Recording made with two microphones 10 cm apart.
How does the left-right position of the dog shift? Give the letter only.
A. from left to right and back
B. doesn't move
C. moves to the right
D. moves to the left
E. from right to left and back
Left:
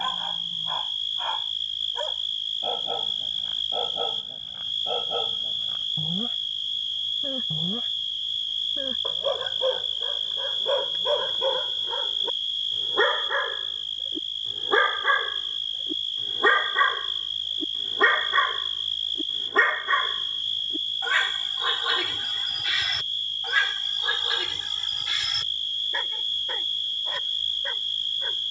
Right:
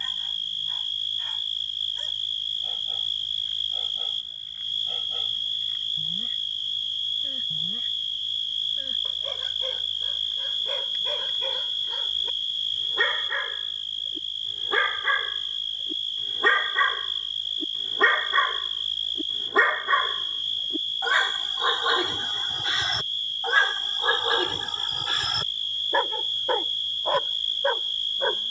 C.